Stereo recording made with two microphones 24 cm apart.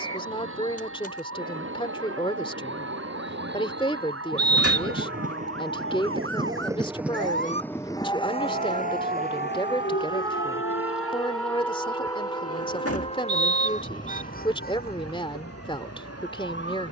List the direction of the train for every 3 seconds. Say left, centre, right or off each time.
right, right, centre, left, left, left.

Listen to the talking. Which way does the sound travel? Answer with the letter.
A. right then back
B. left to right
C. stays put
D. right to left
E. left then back
C.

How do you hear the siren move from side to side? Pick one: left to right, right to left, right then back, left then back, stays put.
right to left.